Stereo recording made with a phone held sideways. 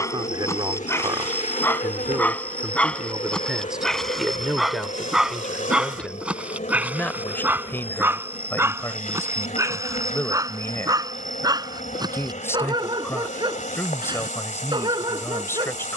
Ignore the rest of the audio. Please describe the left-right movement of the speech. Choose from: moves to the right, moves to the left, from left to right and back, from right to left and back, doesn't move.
moves to the left.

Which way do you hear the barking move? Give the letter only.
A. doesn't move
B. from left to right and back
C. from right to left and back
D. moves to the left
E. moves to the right
E.